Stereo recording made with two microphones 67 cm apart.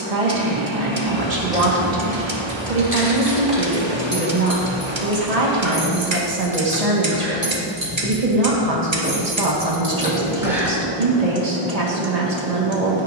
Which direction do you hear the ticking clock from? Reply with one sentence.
You can hear the ticking clock on the right.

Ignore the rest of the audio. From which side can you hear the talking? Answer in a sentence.
You can hear the talking on the right.